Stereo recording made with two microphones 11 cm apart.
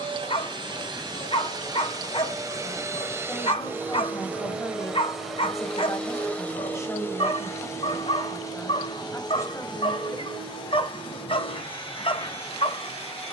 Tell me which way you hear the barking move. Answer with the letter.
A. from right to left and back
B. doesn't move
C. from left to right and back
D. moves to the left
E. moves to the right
B.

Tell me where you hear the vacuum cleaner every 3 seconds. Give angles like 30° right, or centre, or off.
40° right, 10° right, 20° left, 50° left, 60° left.